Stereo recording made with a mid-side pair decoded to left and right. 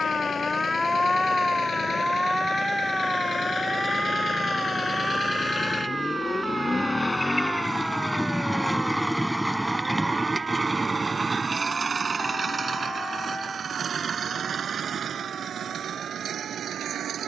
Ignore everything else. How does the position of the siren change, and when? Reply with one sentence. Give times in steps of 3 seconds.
You can hear the siren in the centre from 0 s and on the right from 3 s.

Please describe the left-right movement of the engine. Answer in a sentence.
You can hear the engine move from left to right.